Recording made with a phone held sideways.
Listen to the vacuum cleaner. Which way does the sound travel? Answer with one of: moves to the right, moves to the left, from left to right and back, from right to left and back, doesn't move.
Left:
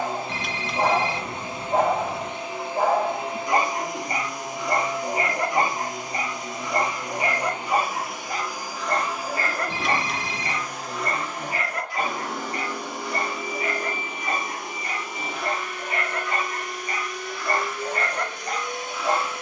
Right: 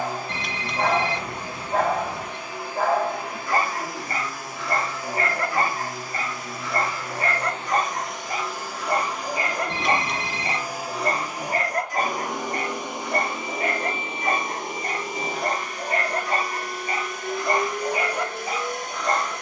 moves to the right.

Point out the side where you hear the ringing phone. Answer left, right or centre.
centre.